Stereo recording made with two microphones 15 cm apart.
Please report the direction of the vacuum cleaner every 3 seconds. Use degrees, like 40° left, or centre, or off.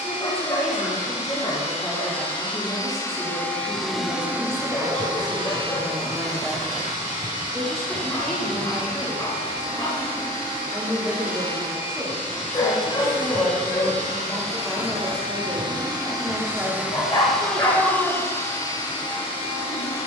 40° left, 10° right, 60° right, 70° right, 50° right, 10° right, 30° left.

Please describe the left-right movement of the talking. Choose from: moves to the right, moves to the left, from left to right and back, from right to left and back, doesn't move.
doesn't move.